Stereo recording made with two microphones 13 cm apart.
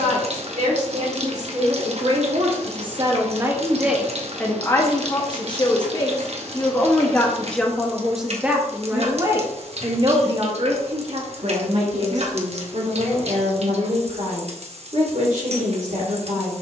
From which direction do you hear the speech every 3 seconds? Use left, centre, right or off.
right, centre, centre, right, right, right.